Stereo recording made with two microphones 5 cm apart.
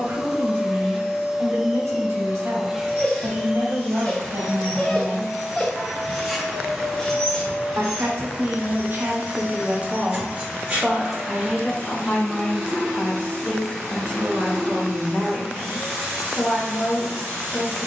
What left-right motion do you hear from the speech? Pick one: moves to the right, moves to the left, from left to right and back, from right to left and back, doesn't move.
moves to the left.